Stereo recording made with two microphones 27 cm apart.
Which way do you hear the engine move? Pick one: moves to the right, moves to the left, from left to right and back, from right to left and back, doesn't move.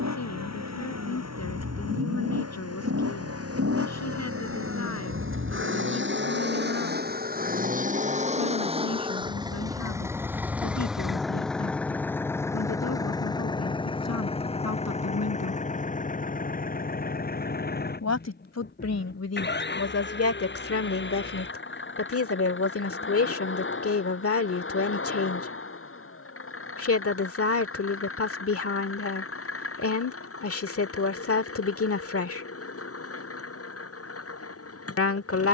moves to the left.